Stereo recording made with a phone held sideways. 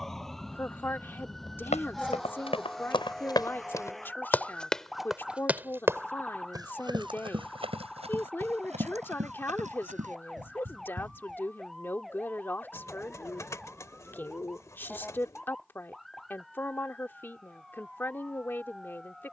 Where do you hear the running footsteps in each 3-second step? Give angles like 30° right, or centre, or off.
40° left, 10° left, 40° right, 50° right, off, off, off.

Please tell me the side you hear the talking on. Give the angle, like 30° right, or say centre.
10° left.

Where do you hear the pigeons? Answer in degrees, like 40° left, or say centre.
20° left.